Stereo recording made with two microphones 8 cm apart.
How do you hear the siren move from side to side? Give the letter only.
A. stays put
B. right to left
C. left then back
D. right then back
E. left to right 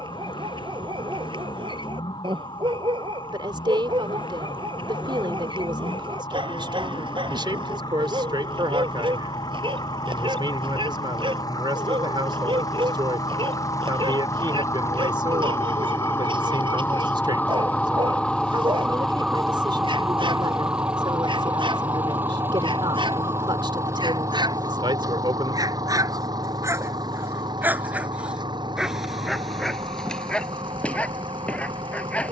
E.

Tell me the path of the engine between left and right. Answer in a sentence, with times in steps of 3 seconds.
In this clip you hear the engine on the left from 0 s, in the centre from 18 s and on the right from 21 s.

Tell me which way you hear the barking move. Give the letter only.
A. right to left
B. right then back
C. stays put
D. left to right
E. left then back
A.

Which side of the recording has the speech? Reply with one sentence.
You can hear the speech on the right.